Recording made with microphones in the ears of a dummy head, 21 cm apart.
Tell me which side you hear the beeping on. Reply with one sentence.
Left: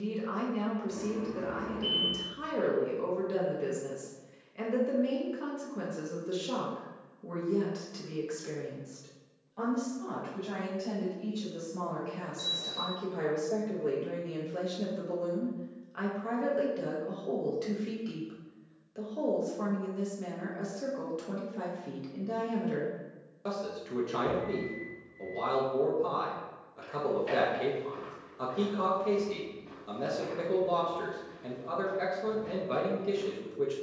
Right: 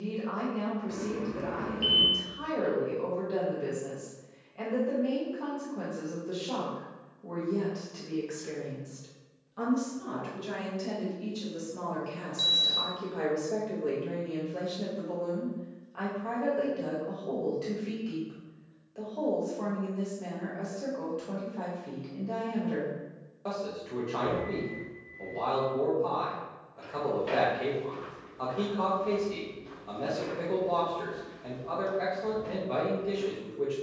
You can hear the beeping on the right.